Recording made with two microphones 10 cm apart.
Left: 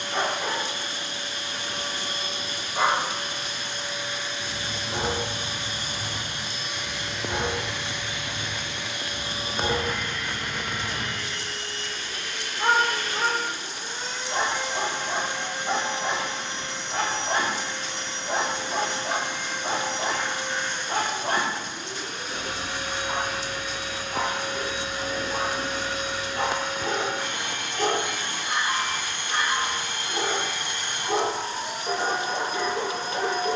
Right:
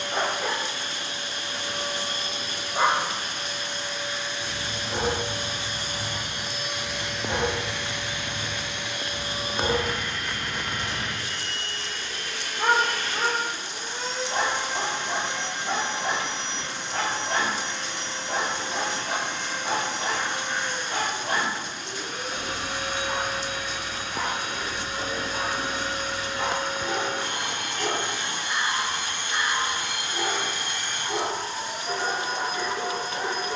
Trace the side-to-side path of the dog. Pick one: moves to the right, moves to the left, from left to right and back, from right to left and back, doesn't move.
moves to the left.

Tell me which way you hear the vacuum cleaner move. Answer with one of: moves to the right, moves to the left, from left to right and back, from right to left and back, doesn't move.
moves to the left.